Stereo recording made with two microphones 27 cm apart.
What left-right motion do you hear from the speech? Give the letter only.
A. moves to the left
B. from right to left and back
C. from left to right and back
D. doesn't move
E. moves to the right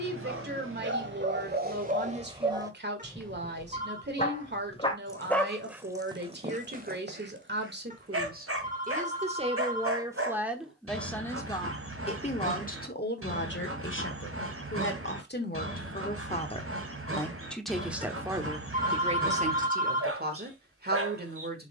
B.